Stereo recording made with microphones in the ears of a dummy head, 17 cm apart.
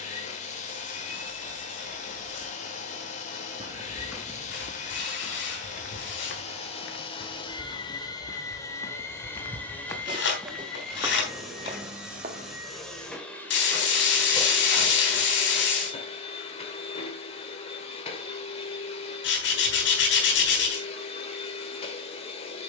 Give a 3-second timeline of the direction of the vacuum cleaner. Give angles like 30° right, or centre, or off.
40° left, 40° left, 30° left, centre, 10° left, 30° left, 30° left, 30° left.